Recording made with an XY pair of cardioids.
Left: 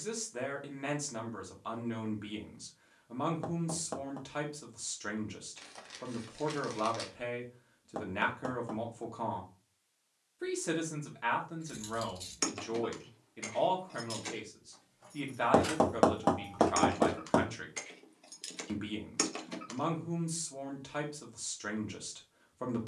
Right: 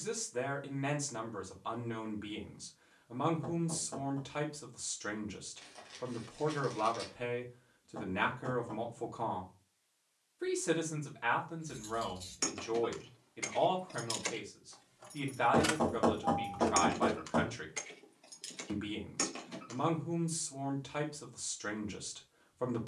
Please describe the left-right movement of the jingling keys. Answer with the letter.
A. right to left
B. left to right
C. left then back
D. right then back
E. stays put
D.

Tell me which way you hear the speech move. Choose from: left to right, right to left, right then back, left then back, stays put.
stays put.